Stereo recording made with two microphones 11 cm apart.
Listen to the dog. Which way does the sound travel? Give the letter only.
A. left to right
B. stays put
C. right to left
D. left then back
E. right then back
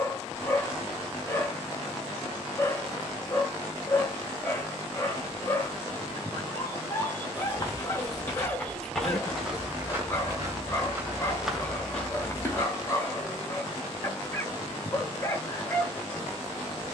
B.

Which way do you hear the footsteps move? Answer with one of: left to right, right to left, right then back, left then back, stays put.
right then back.